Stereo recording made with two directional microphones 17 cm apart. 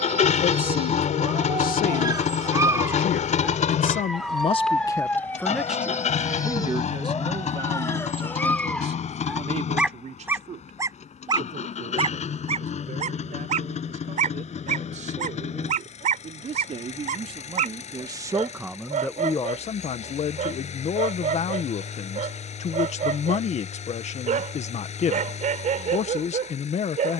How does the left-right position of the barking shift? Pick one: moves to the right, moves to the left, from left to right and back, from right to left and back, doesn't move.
from right to left and back.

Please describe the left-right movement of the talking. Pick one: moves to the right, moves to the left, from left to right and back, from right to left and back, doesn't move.
from left to right and back.